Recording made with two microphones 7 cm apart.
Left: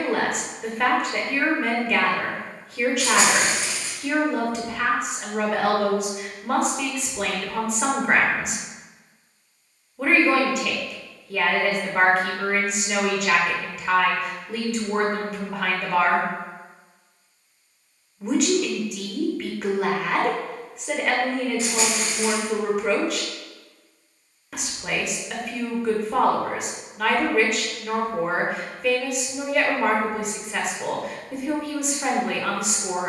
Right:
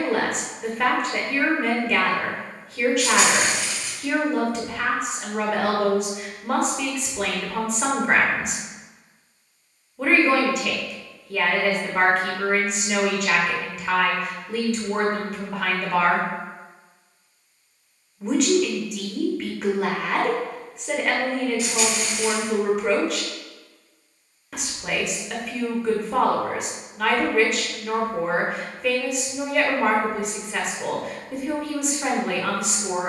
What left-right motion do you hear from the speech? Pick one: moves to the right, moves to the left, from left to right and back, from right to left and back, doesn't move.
doesn't move.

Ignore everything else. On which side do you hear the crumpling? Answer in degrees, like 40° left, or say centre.
30° left.